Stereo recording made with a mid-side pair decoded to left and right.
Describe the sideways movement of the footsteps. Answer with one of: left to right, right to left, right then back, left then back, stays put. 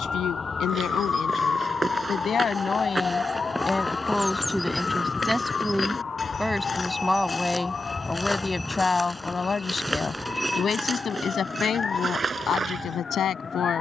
left then back.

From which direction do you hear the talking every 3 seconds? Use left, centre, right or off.
left, centre, centre, left, left.